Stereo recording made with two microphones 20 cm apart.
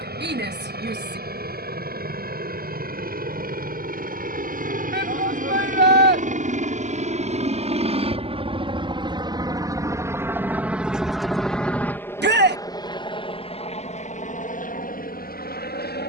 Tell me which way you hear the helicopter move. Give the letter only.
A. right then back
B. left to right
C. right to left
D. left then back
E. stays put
C.